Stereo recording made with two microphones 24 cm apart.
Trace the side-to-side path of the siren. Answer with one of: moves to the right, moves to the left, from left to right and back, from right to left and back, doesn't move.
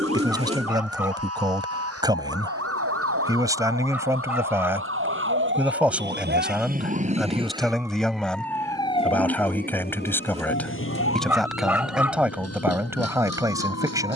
moves to the left.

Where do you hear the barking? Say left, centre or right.
centre.